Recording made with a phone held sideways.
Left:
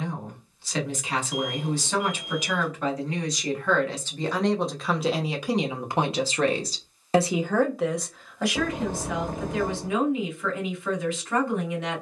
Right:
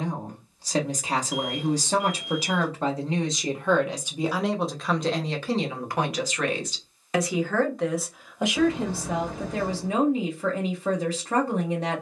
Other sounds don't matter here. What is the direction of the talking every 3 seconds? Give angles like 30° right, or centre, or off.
40° right, centre, 10° left, 40° right.